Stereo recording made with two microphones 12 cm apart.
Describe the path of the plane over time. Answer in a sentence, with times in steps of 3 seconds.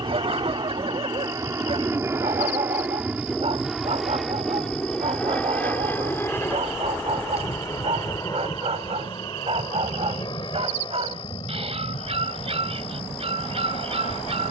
In this clip you hear the plane on the right from 0 s, in the centre from 3 s and on the left from 6 s.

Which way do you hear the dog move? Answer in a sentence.
You can hear the dog stay in one place.